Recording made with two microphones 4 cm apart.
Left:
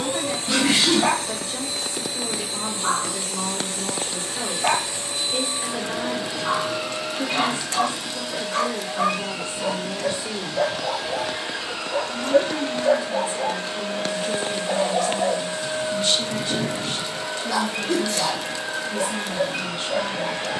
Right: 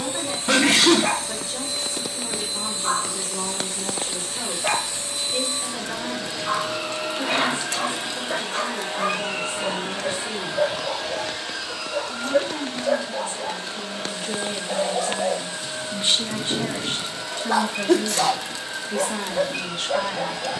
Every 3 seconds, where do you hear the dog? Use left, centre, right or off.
left, left, left, left, left, centre, right.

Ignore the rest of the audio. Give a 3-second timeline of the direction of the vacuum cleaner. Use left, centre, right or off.
left, left, centre, centre, left, left, left.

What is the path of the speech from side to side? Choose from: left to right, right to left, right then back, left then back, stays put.
left to right.